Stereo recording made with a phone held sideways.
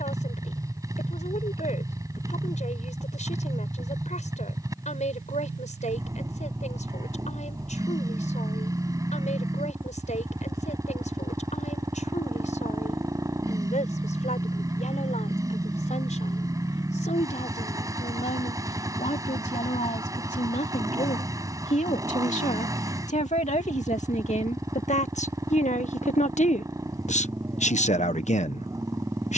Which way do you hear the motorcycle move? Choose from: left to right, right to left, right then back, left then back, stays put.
stays put.